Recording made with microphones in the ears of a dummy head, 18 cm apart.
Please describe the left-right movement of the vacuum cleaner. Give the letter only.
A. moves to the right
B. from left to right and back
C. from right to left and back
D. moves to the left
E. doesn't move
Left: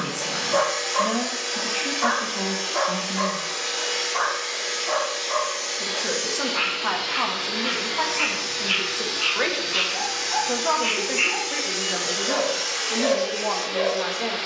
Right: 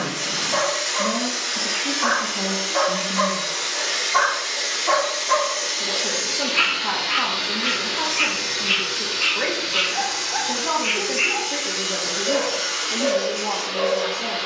D.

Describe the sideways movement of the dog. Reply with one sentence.
In this clip you hear the dog go right and come back.